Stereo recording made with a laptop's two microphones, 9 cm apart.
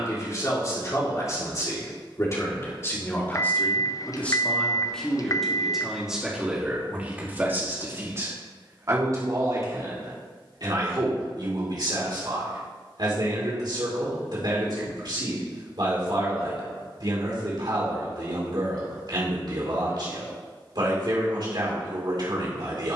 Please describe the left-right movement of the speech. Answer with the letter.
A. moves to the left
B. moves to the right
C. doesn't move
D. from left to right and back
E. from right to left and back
B.